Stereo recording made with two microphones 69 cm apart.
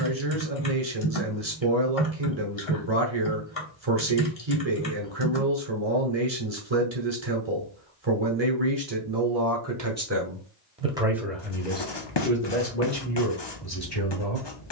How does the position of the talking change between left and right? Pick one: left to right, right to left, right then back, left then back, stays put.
right to left.